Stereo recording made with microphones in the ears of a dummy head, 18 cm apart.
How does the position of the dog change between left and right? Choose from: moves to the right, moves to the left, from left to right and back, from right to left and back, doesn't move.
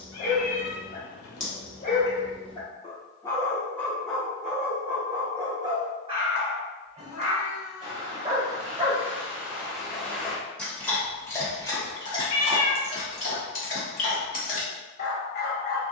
from left to right and back.